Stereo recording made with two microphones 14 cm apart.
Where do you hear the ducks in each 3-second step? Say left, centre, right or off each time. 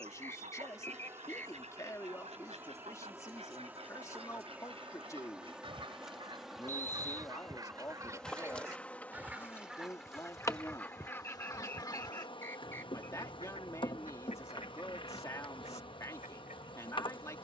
right, right, right, centre, left, left.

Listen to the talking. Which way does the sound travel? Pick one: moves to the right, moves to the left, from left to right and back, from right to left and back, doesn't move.
doesn't move.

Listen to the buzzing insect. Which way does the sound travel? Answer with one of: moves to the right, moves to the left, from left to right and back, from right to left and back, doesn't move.
moves to the left.